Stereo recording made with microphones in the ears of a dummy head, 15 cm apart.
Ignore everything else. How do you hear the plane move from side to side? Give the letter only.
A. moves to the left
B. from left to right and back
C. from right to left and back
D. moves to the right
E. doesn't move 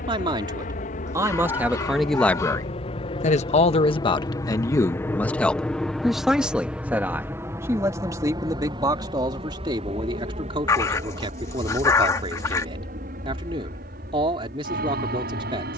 D.